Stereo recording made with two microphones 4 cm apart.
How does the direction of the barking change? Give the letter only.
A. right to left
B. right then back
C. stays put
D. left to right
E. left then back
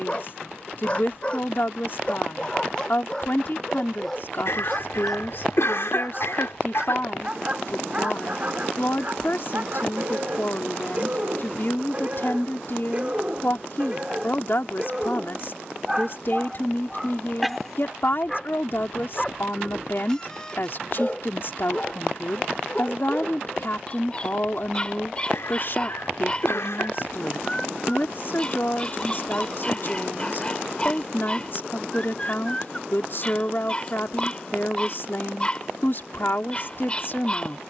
B.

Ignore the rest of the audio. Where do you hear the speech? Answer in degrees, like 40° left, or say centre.
50° left.